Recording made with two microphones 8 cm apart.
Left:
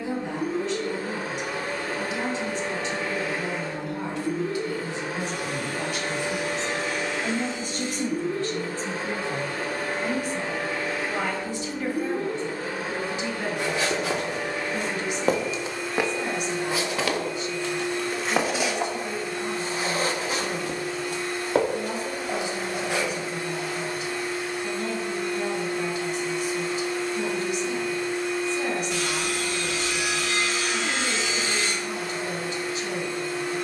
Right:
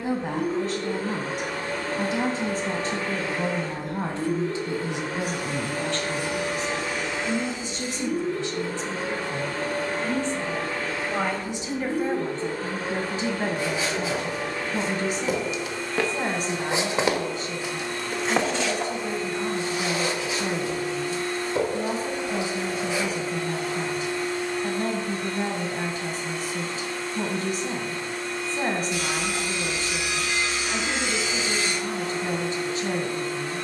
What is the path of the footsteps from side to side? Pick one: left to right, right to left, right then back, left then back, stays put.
right then back.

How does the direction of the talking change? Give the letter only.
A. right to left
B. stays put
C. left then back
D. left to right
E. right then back
C.